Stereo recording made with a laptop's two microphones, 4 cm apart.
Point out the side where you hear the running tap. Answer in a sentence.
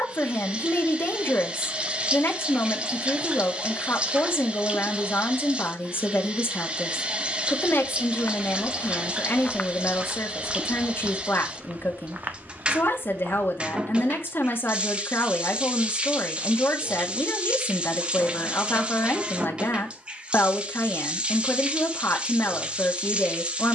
You can hear the running tap on the right.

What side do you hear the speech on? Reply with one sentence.
You can hear the speech on the left.